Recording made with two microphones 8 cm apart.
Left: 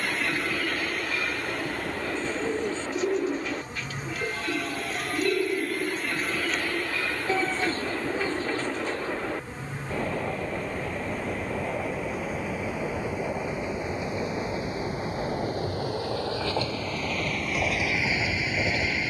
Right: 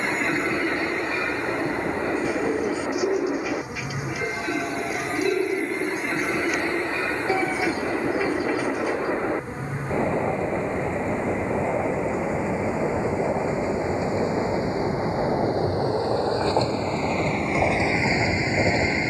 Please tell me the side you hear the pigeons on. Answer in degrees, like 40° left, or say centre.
10° right.